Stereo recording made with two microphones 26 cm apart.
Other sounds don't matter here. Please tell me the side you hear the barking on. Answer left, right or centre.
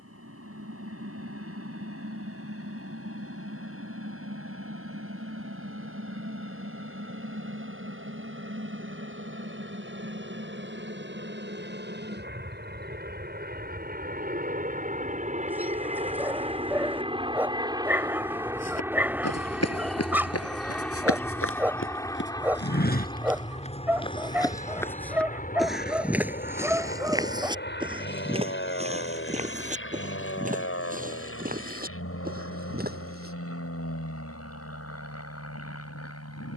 centre.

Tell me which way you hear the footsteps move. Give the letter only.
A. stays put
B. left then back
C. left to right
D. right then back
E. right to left
C.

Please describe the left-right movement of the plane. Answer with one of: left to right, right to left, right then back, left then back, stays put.
right to left.